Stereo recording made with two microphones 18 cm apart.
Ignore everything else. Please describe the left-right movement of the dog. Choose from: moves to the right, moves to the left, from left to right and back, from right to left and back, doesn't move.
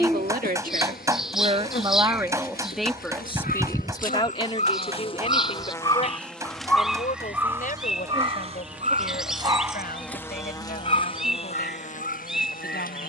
from left to right and back.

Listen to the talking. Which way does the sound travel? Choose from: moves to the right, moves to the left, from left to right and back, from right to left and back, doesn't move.
moves to the left.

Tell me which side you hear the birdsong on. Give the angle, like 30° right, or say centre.
centre.